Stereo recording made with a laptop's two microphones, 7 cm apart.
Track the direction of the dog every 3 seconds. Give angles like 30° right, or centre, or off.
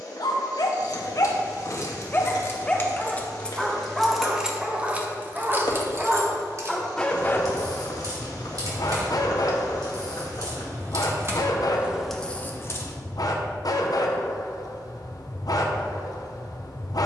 40° left, 10° right, 30° left, 60° left, 60° left, 60° left.